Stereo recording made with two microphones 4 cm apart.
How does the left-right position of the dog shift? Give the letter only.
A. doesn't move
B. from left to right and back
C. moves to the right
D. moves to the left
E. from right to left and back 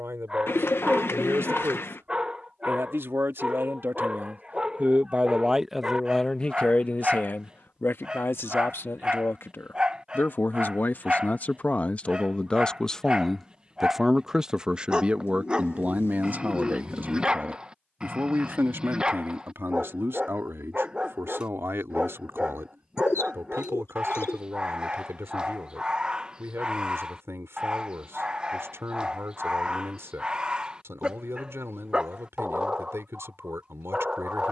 A.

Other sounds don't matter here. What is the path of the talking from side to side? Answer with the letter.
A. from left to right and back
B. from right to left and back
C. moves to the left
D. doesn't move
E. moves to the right
B.